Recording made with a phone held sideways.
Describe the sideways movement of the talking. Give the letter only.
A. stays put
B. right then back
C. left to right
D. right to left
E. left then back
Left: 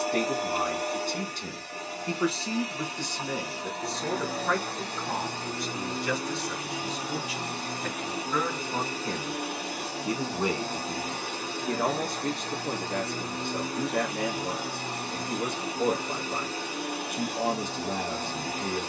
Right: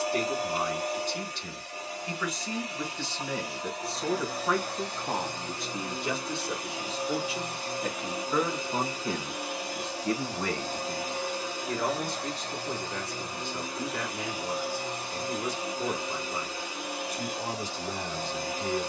B.